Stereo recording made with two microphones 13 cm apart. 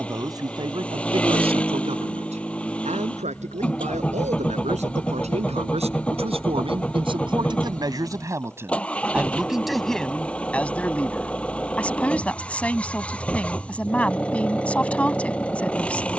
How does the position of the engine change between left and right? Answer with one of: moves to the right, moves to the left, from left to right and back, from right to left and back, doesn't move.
doesn't move.